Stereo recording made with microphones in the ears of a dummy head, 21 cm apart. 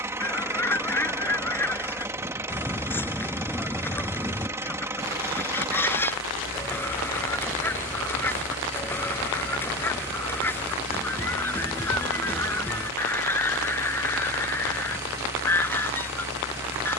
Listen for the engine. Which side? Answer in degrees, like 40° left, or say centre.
10° right.